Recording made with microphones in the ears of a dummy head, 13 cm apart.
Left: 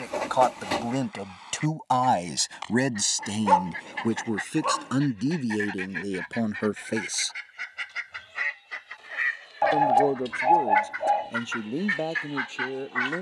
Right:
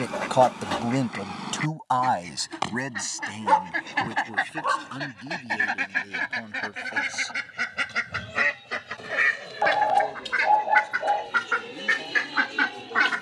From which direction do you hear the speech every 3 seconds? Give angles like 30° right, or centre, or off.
10° left, 50° left, 60° left, 70° left, 70° left.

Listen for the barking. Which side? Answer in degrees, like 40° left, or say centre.
10° left.